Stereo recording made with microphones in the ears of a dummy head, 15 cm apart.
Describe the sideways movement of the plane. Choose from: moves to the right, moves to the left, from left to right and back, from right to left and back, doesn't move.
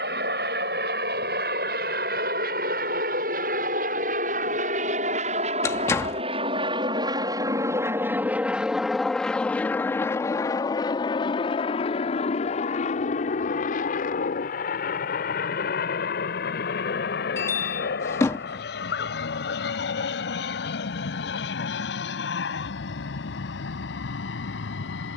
moves to the left.